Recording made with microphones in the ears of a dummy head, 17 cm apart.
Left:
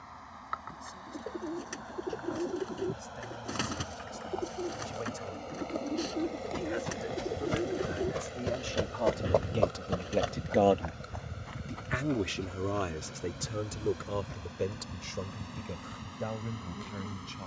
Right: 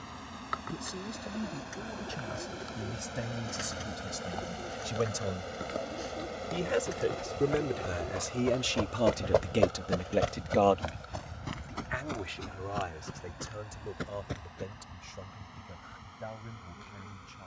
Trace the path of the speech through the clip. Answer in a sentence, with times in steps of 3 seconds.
You can hear the speech on the right from 0 s, in the centre from 9 s and on the left from 12 s.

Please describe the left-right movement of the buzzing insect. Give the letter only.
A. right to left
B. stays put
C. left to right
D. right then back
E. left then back
A.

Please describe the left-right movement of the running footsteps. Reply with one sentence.
You can hear the running footsteps move from left to right.